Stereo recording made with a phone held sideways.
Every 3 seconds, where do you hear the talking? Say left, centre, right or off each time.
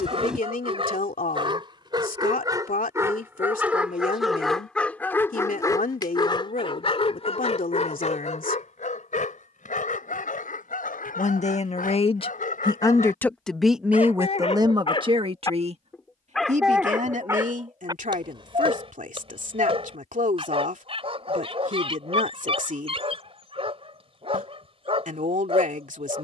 left, left, left, left, centre, right, right, right, right.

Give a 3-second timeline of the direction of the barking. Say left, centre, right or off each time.
right, centre, left, left, left, centre, right, right, right.